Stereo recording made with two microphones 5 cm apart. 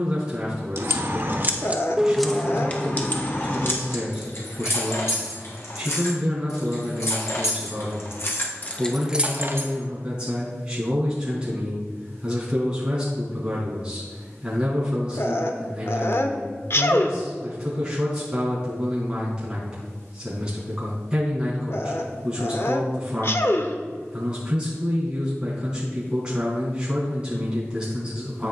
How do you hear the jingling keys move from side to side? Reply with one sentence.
In this clip you hear the jingling keys move from right to left and back again.